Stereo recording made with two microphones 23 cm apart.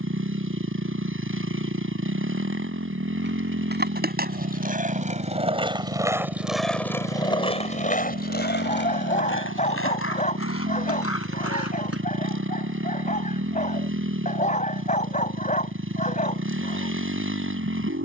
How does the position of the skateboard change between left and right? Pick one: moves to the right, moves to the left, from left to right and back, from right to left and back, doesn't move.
moves to the left.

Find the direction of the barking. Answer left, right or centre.
left.